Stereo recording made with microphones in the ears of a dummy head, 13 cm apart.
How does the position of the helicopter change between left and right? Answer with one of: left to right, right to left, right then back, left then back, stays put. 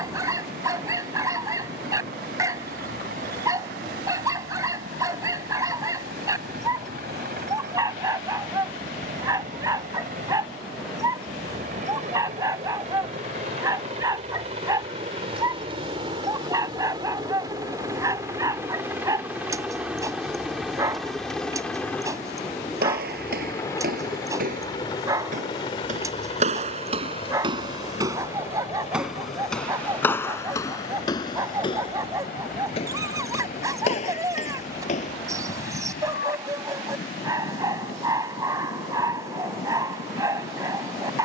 right to left.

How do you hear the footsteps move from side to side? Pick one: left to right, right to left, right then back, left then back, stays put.
right to left.